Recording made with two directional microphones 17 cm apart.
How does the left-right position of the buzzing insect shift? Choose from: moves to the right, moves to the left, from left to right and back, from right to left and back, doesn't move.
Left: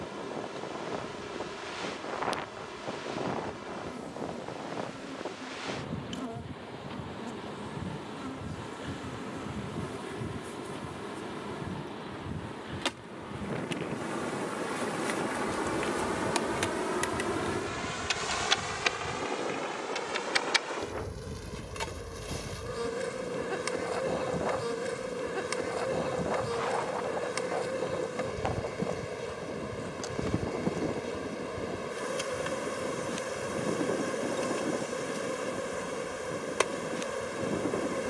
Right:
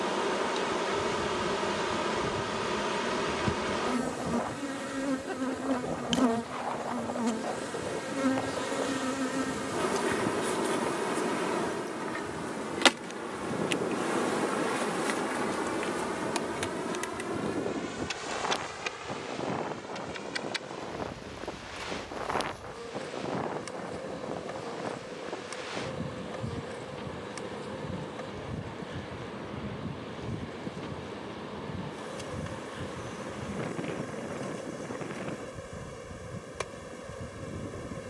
moves to the left.